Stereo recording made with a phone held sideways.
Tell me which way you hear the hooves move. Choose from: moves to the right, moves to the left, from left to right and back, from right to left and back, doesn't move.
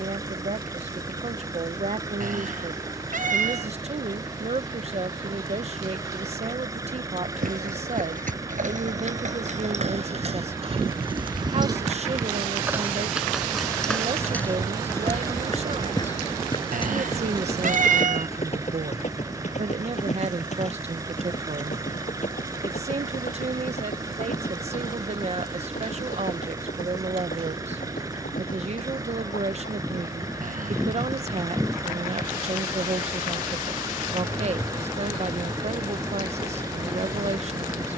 moves to the left.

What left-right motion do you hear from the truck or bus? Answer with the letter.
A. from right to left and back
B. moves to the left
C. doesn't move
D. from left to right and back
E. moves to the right
C.